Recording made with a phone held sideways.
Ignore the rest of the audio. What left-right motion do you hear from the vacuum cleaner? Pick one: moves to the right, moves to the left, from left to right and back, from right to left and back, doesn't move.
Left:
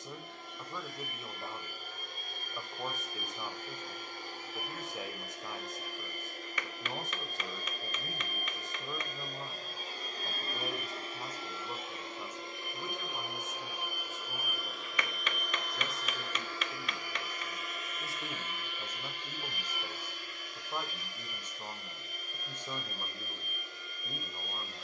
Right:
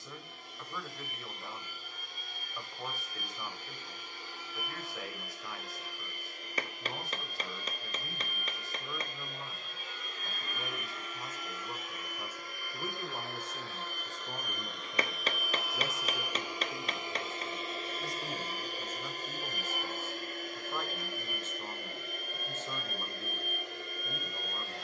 moves to the right.